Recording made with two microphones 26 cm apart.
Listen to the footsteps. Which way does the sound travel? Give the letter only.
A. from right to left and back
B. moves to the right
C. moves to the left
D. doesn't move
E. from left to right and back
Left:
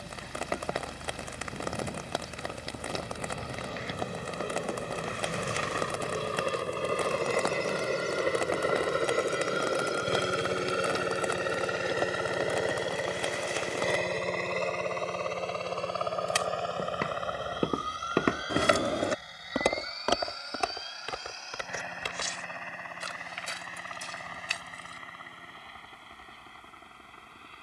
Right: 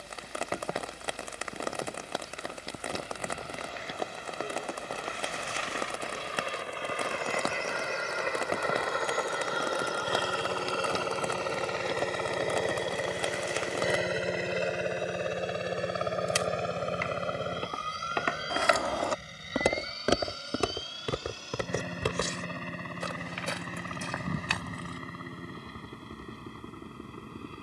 B.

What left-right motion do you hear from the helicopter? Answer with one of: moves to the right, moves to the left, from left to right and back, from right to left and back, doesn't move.
moves to the right.